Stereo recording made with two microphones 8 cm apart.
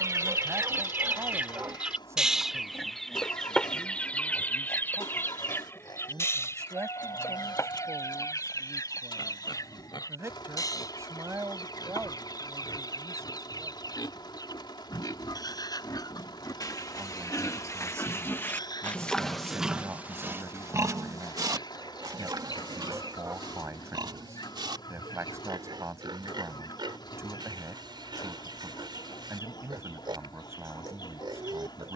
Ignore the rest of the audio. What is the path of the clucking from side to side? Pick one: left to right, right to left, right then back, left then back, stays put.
right to left.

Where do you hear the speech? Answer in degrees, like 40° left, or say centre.
40° right.